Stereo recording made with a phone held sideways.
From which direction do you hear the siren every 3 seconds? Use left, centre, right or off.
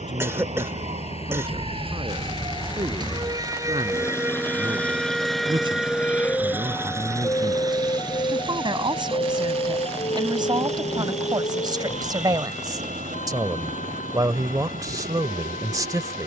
right, centre, left, left, left, left.